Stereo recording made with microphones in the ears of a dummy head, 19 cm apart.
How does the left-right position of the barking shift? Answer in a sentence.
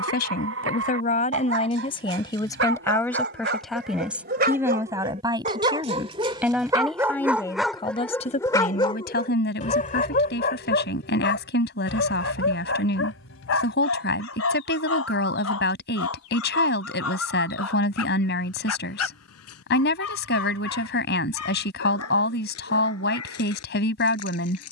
In this clip you hear the barking go from the right side to the left.